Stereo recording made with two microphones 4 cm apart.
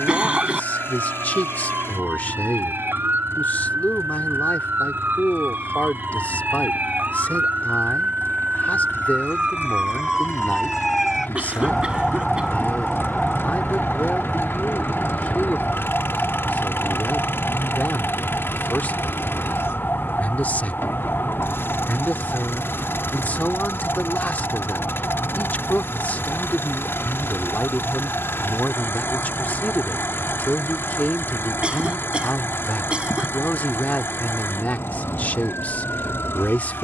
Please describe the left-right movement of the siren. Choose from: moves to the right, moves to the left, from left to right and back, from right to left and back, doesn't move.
moves to the left.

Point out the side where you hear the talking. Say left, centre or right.
left.